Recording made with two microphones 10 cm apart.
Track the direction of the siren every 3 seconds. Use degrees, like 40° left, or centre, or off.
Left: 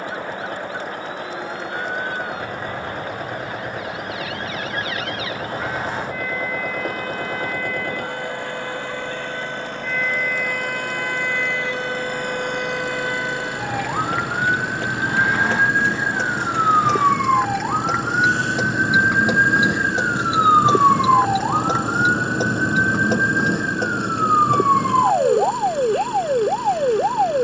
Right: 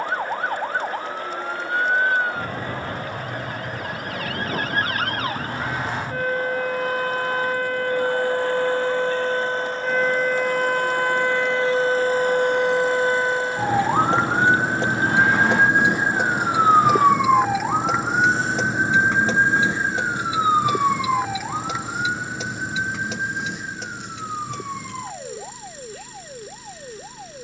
50° right, 50° right, 50° right, 40° right, 30° right, 10° right, 10° left, 40° left, 60° left.